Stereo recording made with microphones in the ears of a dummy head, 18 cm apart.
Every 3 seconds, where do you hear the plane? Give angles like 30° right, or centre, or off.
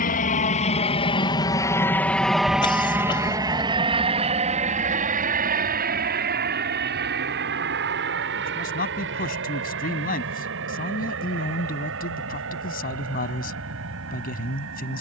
20° left, 30° right, 50° right, 60° right, 60° right.